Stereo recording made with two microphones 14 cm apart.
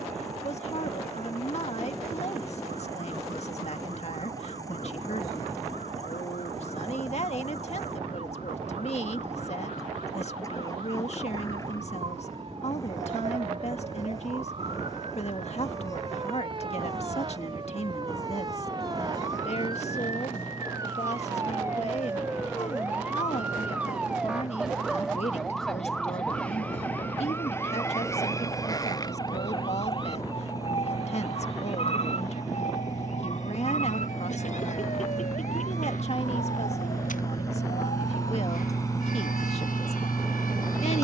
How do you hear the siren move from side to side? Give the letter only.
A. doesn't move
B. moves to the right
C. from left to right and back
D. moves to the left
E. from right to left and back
D.